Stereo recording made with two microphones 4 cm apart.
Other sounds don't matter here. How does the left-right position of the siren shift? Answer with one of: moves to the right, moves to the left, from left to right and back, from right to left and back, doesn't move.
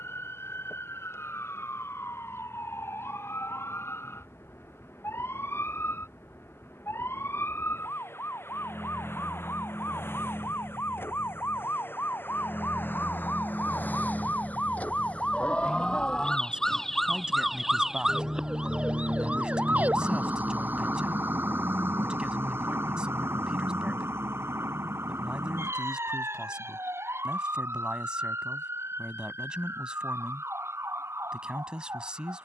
moves to the right.